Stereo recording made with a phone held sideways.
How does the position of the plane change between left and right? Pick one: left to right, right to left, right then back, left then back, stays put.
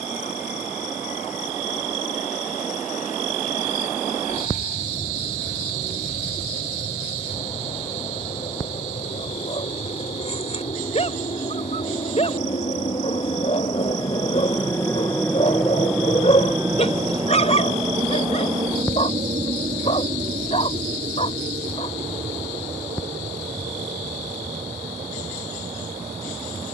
left to right.